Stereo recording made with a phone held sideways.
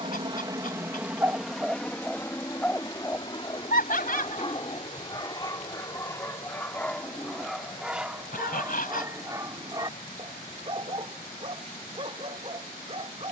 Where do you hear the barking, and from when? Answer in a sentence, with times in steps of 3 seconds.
You can hear the barking in the centre from 0 s, on the left from 3 s, in the centre from 6 s and on the right from 9 s.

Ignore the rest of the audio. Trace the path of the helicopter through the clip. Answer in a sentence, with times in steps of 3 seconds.
In this clip you hear the helicopter in the centre from 0 s and on the left from 3 s.